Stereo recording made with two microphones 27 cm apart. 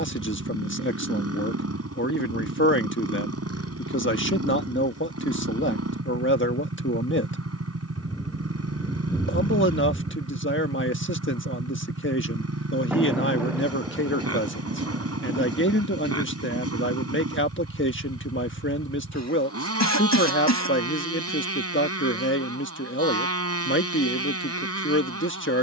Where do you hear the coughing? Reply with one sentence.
In this clip you hear the coughing on the left.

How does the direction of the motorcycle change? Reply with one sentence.
You can hear the motorcycle stay put.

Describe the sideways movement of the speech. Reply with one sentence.
You can hear the speech stay put.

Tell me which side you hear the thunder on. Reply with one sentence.
In this clip you hear the thunder in the centre.